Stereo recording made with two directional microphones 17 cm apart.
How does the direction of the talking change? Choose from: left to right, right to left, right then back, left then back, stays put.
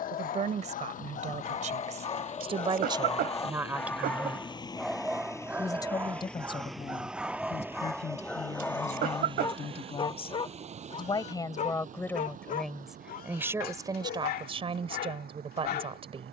left then back.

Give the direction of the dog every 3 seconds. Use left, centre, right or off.
left, centre, centre, left, left, left.